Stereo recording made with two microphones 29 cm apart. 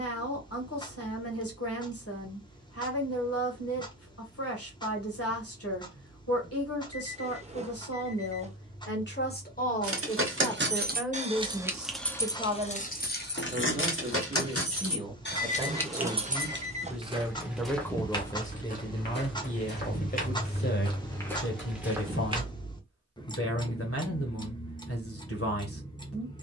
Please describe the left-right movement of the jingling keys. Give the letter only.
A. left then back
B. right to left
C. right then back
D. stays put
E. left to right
A.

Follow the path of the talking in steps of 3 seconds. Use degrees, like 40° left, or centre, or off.
60° left, 60° left, 50° left, 10° left, 20° right, 10° right, 20° left, 50° left, 50° left.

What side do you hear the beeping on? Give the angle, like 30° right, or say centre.
20° right.